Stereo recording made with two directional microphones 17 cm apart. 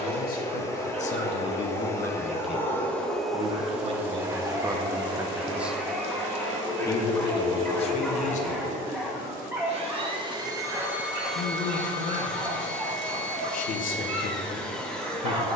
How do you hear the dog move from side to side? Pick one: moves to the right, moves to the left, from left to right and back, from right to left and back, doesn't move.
from right to left and back.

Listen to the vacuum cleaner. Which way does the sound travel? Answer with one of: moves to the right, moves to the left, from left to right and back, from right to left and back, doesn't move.
from left to right and back.